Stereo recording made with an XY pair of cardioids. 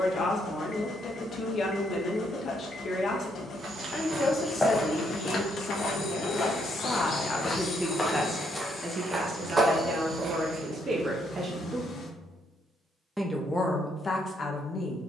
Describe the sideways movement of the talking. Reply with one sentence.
In this clip you hear the talking move from left to right and back again.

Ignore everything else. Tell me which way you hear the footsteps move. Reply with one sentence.
In this clip you hear the footsteps go left and come back.